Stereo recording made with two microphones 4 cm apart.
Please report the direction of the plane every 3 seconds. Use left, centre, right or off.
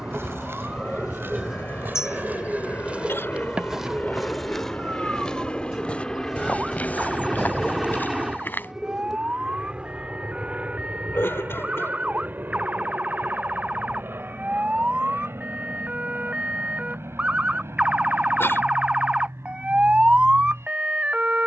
left, left, centre, right, right, right, right.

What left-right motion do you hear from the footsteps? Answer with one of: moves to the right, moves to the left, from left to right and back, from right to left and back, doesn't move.
moves to the left.